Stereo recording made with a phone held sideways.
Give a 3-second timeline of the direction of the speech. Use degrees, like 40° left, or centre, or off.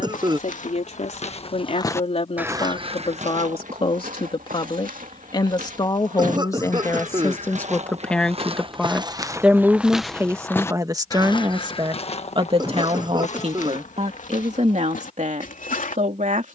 50° left, 40° left, 10° left, 20° right, 50° right, 60° right.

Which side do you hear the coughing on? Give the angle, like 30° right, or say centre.
30° right.